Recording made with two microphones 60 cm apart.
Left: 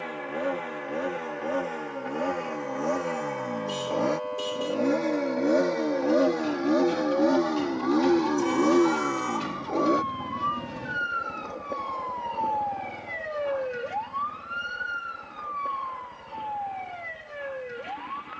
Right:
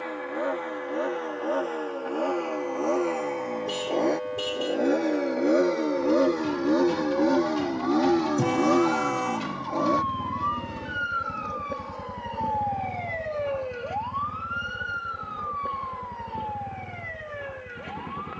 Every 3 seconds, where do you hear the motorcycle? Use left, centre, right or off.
left, left, centre, right, right, right.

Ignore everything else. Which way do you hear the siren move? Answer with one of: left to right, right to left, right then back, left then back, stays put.
right to left.